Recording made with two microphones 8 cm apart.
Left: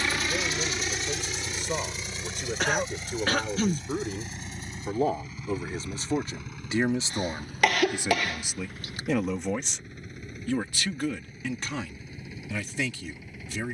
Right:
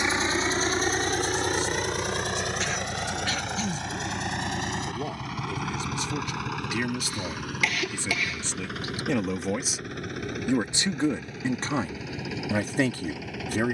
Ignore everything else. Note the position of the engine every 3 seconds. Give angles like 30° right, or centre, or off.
50° right, 70° right, 80° right, 80° right, 80° right.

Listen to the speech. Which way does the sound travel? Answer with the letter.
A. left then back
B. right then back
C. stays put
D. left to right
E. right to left
D.